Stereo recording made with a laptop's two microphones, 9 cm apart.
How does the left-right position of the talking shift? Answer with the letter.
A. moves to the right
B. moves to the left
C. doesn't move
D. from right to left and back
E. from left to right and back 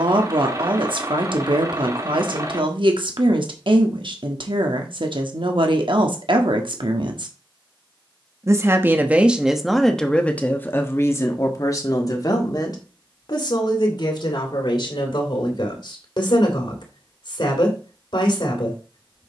B.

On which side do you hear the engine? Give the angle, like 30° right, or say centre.
40° right.